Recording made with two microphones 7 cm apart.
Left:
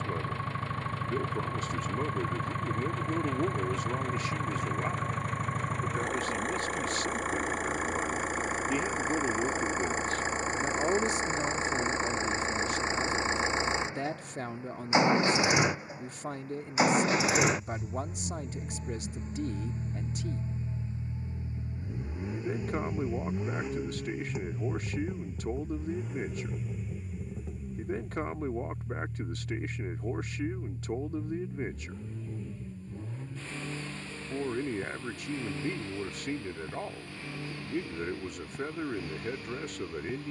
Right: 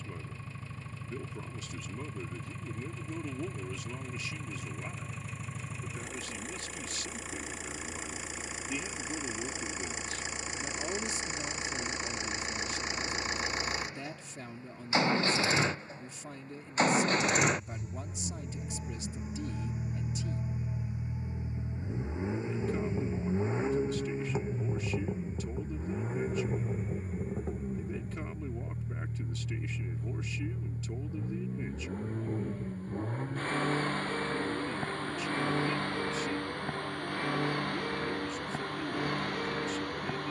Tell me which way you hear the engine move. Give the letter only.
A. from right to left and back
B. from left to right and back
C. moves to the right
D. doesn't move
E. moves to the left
C.